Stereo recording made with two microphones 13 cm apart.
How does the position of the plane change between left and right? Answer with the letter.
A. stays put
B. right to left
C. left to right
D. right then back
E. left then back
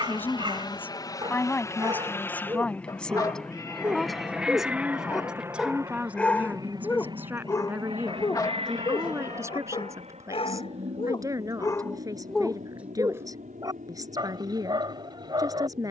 C.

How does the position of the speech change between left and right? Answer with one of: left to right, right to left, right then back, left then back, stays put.
left to right.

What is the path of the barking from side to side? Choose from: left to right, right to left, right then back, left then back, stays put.
left then back.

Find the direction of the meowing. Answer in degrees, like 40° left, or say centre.
30° left.